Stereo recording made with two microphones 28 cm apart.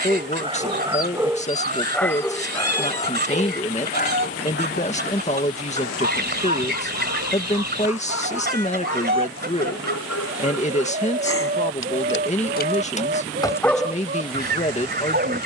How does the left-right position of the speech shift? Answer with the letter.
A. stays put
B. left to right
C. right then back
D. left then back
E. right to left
A.